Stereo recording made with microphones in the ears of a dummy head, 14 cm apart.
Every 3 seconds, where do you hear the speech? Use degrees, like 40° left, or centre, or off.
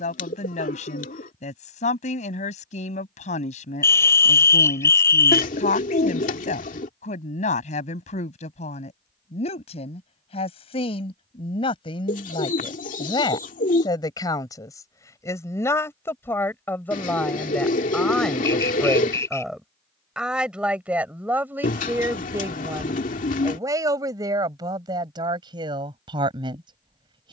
50° left, 50° left, 50° left, 40° left, 30° left, 10° left, centre, 20° right, 30° right.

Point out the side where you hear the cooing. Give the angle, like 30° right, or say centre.
50° left.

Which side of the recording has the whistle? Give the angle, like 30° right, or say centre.
20° left.